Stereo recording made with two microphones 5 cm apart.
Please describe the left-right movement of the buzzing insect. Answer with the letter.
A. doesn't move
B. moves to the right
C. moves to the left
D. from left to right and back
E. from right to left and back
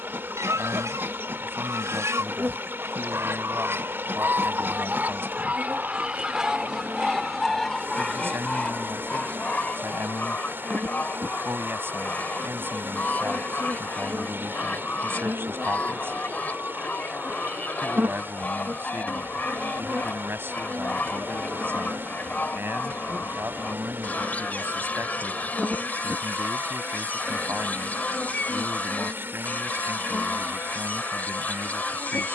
C.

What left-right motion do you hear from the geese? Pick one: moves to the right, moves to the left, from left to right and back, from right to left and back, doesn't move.
moves to the left.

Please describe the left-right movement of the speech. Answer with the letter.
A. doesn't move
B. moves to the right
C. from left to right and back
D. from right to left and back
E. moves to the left
A.